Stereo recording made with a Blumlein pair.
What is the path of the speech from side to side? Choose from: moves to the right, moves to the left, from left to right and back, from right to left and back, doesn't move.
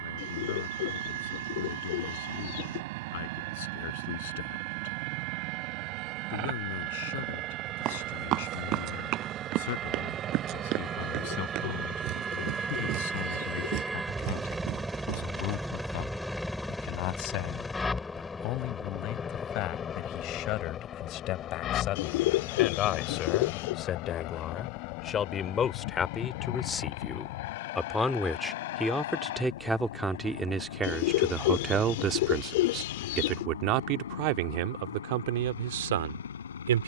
moves to the right.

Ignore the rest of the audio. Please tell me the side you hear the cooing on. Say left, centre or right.
left.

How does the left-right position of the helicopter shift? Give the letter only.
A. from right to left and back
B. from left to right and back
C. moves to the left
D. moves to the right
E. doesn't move
C.